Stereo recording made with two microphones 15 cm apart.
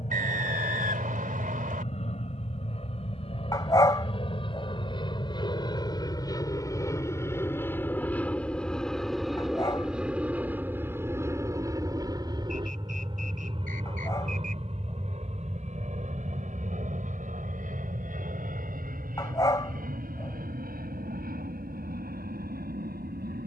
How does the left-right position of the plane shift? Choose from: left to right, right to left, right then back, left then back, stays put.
left to right.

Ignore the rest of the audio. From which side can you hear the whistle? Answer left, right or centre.
right.